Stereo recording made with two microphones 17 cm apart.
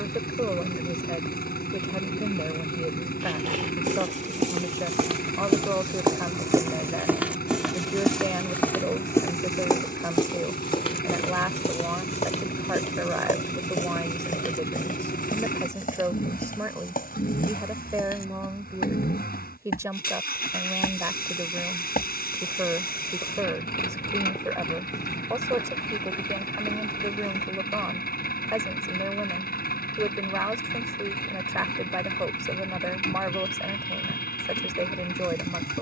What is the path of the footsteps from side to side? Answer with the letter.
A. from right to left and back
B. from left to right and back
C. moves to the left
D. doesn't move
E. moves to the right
A.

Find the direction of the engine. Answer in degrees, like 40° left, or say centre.
60° left.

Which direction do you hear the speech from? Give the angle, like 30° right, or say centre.
20° right.